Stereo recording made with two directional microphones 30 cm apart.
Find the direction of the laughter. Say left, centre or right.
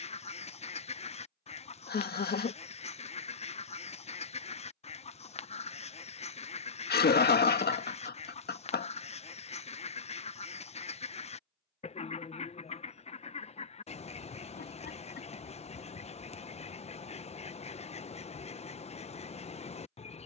left.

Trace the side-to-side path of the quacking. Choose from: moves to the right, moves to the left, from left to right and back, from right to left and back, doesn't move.
doesn't move.